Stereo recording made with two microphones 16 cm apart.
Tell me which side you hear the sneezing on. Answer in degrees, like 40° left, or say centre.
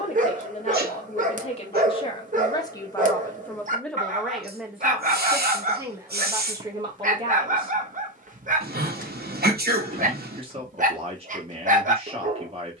80° right.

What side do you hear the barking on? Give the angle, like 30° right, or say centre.
50° right.